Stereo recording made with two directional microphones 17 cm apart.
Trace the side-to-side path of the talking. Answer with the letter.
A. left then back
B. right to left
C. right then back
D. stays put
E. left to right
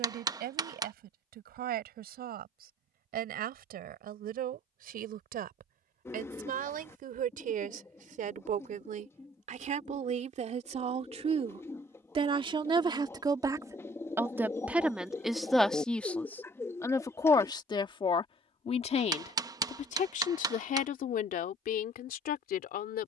B.